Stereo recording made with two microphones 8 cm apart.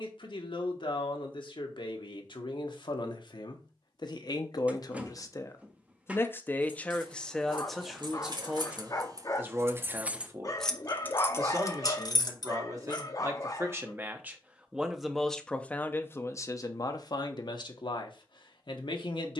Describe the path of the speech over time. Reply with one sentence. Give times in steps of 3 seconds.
You can hear the speech on the left from 0 s, in the centre from 6 s, on the right from 9 s and on the left from 15 s.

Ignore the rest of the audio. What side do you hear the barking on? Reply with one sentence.
You can hear the barking on the left.